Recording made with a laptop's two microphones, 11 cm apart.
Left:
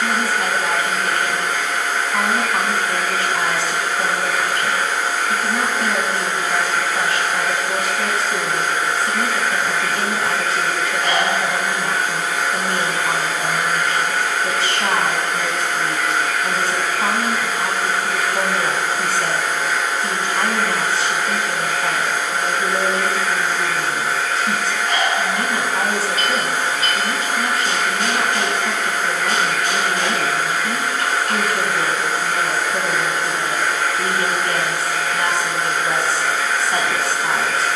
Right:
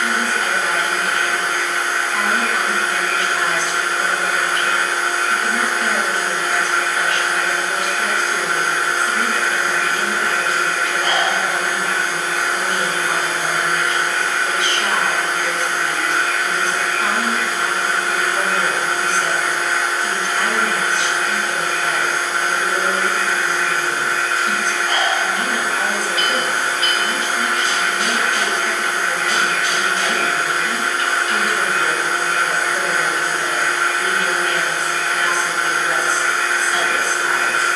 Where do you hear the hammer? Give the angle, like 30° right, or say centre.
40° left.